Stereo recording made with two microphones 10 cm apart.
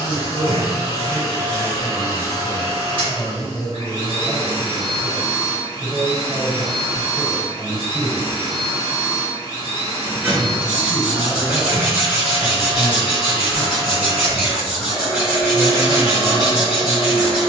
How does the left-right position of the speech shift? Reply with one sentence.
You can hear the speech stay in one place.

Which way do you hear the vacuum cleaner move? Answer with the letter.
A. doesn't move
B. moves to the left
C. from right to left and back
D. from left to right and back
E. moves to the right
A.